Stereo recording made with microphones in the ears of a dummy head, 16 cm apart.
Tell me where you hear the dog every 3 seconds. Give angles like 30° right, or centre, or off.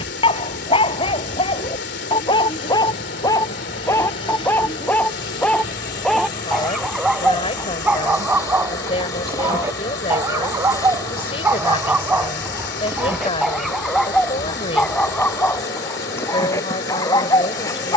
30° left, 10° left, 10° right, 10° right, centre, 10° left.